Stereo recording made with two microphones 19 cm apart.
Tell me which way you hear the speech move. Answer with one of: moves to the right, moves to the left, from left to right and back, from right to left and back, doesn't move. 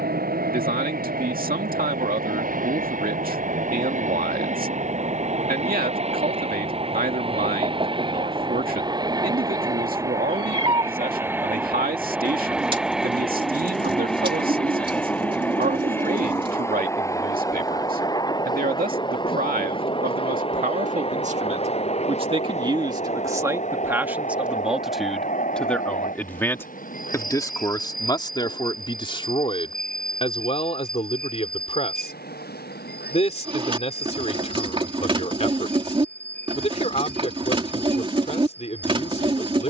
moves to the left.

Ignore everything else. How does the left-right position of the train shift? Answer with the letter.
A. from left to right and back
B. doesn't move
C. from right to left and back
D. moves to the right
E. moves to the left
E.